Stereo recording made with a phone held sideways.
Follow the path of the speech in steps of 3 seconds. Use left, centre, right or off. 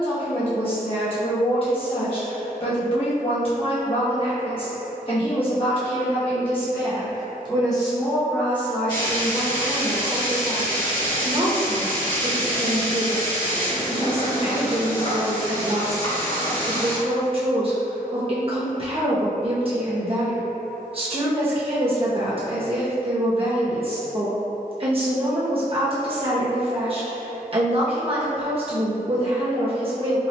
left, left, left, right, right, right, right, right, right, right.